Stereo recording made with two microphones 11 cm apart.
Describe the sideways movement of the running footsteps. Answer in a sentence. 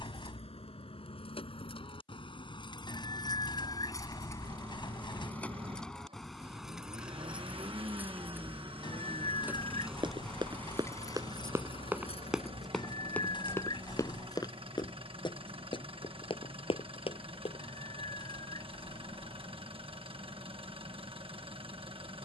You can hear the running footsteps move to the left.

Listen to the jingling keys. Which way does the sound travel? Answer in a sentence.
In this clip you hear the jingling keys go right and come back.